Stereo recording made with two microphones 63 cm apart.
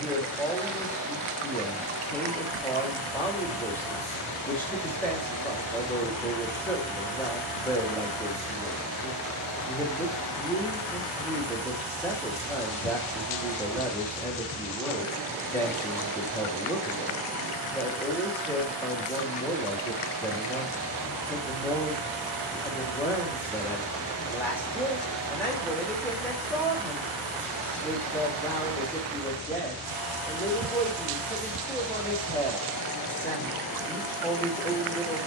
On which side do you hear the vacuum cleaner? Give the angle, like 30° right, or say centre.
40° right.